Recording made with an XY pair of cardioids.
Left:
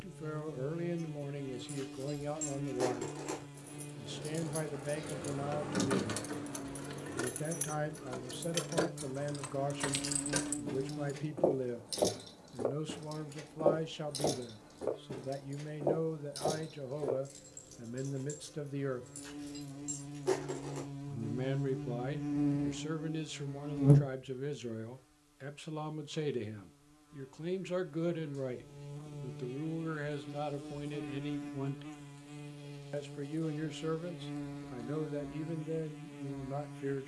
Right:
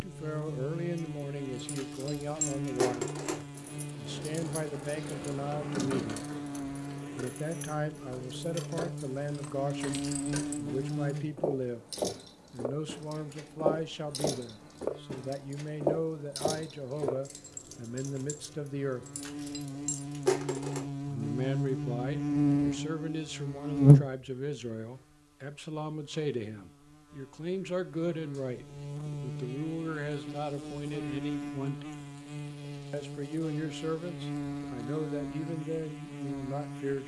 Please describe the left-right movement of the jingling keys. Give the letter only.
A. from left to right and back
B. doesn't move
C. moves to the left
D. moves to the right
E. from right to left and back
E.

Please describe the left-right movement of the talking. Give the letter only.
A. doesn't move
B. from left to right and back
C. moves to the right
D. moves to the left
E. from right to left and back
A.